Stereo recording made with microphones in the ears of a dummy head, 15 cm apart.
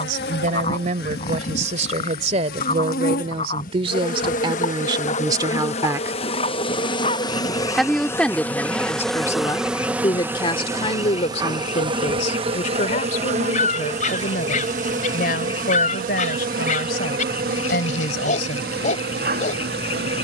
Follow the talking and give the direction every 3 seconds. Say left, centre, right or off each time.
right, right, centre, left, left, left, left.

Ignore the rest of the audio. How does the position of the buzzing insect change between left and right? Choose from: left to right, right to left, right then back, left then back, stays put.
left to right.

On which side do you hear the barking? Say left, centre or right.
left.